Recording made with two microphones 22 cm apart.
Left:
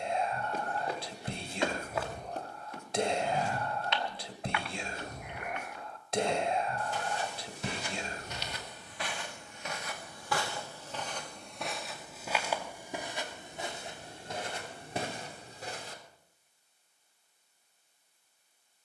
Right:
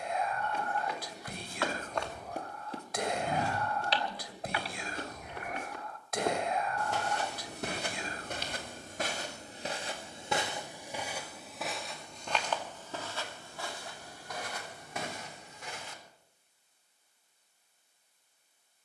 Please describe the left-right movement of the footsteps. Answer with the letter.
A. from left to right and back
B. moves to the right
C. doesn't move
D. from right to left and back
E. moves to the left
A.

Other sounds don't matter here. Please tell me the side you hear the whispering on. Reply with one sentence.
In this clip you hear the whispering on the left.